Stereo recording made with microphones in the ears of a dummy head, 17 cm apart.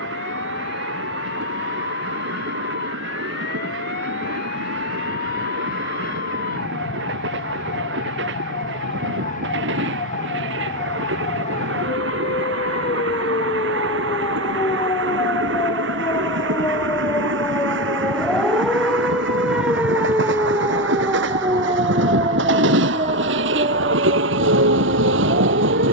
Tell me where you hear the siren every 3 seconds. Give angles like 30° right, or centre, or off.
60° left, 50° left, 50° left, 40° left, 30° left, 20° left, 10° right, 30° right, 40° right.